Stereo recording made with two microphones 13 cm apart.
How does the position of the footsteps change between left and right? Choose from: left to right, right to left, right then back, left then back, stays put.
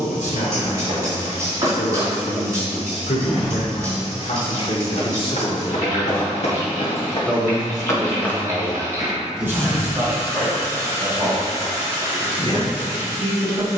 left then back.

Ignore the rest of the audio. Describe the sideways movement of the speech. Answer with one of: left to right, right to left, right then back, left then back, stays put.
left to right.